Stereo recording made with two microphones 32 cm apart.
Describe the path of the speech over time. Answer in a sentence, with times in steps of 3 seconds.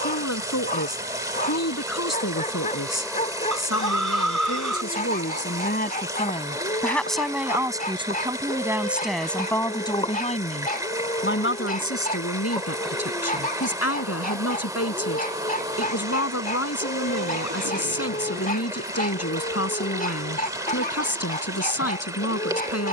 You can hear the speech on the left from 0 s, in the centre from 6 s and on the left from 9 s.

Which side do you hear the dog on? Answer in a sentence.
In this clip you hear the dog on the left.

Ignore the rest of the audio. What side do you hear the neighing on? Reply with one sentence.
In this clip you hear the neighing on the right.